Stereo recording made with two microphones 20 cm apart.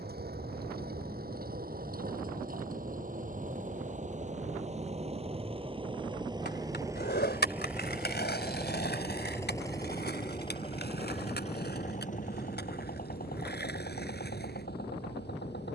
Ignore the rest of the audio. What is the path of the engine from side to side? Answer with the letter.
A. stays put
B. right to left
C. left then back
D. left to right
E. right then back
B.